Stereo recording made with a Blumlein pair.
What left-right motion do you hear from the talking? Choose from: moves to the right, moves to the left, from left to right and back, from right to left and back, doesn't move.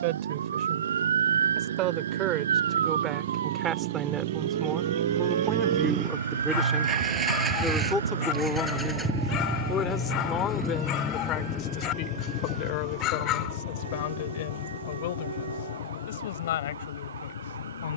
moves to the left.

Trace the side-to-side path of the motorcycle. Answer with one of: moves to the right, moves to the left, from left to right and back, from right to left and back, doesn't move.
moves to the left.